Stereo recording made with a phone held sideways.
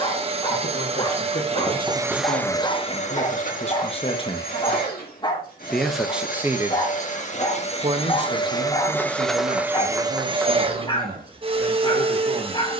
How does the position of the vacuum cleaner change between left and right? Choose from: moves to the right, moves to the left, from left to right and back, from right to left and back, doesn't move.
from right to left and back.